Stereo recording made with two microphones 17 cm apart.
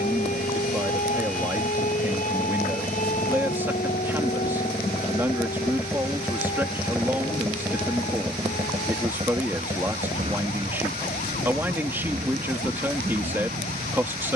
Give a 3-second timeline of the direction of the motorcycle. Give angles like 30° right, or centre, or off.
50° left, 20° left, 10° right, 30° right, 50° right.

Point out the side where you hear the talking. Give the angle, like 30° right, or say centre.
10° right.